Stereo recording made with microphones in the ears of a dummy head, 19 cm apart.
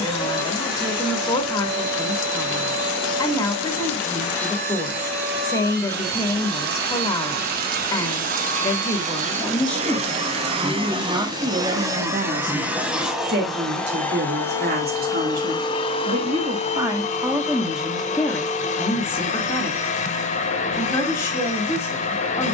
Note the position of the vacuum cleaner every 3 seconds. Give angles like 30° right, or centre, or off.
60° right, 60° right, 50° right, 30° right, centre, 30° left, 40° left, 40° left.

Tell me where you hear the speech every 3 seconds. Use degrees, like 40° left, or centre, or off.
20° left, 20° left, 20° left, 10° right, 50° right, 20° right, 10° left, 10° left.